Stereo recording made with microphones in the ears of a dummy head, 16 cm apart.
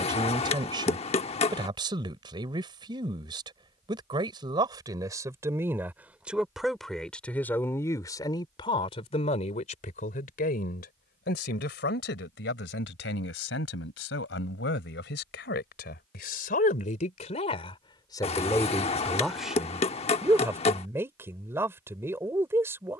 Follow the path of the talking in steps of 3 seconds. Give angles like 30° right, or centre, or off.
30° right, 20° right, 10° left, 50° left, 70° left, 50° left, centre, 10° right.